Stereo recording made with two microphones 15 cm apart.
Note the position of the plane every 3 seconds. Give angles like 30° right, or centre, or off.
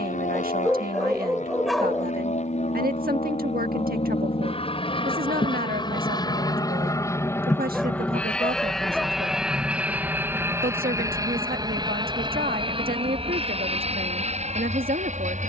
60° left, 40° left, 20° left, 10° right, 40° right.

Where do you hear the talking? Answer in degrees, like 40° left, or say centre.
80° right.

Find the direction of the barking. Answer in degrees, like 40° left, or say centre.
centre.